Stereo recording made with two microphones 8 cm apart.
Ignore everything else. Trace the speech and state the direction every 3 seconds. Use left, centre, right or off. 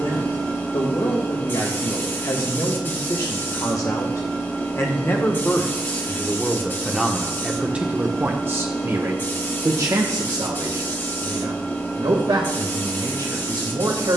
left, left, centre, right, right.